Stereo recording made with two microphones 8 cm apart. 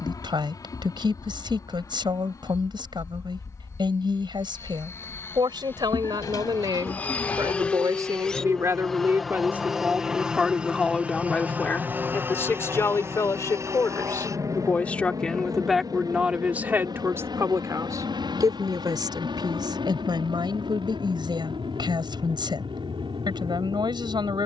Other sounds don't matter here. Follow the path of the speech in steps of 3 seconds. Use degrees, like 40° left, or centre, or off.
70° right, 70° right, 50° right, centre, 30° left, 20° right, 60° right, 70° right.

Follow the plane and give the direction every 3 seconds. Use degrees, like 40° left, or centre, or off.
50° left, 30° left, 20° left, 10° right, 30° right, 50° right, 60° right, 70° right.